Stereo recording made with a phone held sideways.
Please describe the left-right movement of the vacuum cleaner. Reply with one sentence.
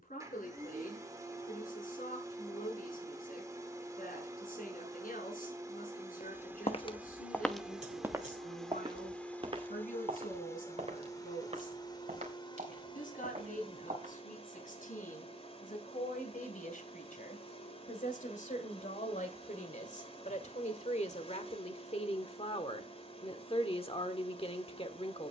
You can hear the vacuum cleaner move to the left.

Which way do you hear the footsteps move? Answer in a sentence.
You can hear the footsteps move from left to right.